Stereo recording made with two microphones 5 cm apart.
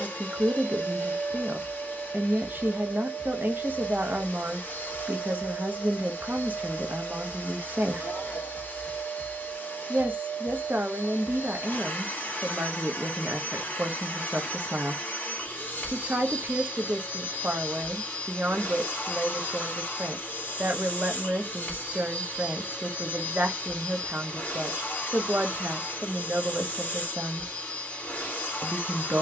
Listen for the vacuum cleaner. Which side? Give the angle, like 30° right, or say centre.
40° left.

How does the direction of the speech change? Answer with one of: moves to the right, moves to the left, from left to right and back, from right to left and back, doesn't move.
doesn't move.